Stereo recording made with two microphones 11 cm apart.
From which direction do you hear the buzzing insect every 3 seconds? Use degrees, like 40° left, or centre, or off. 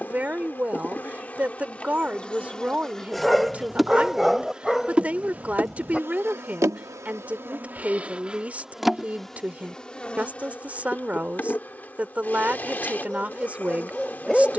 10° left, 10° right, 20° right, 10° left, 20° left.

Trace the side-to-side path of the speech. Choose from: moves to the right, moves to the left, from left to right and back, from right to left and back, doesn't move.
doesn't move.